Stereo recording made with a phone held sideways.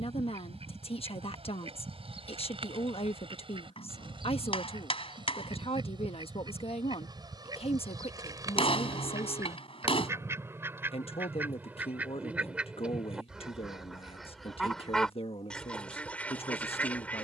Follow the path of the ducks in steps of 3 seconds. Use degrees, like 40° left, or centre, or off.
40° right, 40° right, 30° right, 20° right, centre, 10° left.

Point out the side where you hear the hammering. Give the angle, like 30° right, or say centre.
40° left.